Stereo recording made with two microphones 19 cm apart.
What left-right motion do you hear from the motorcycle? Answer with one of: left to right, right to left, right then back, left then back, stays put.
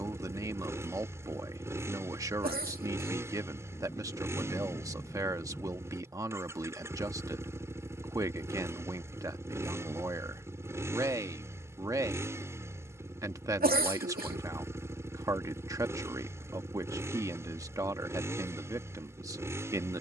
stays put.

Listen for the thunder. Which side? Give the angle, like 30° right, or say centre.
20° left.